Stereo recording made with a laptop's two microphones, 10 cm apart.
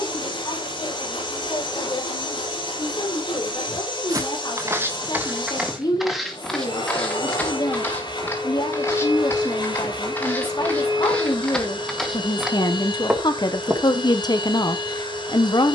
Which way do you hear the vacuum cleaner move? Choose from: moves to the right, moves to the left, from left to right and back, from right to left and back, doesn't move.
doesn't move.